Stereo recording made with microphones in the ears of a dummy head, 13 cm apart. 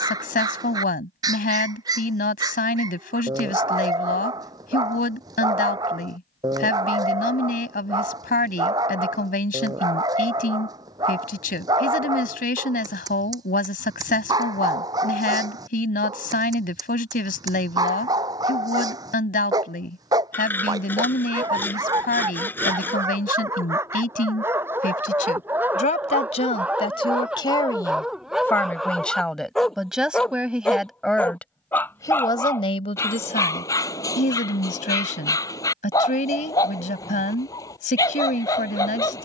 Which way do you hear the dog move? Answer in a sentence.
You can hear the dog move to the left.